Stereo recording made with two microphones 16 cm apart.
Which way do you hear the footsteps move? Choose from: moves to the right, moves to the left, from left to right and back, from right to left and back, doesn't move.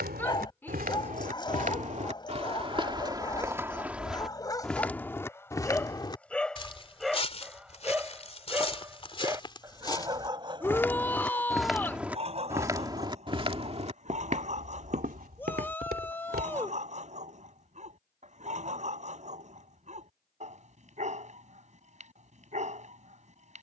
from right to left and back.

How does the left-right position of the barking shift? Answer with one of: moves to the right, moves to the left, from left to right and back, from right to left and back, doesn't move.
moves to the right.